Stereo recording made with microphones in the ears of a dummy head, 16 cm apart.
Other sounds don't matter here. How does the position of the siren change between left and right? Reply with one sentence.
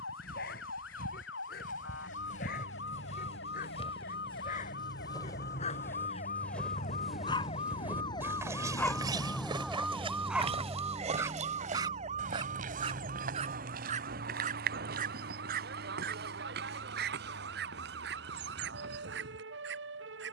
You can hear the siren move from left to right.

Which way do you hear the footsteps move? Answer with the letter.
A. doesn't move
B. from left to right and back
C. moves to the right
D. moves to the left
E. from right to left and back
C.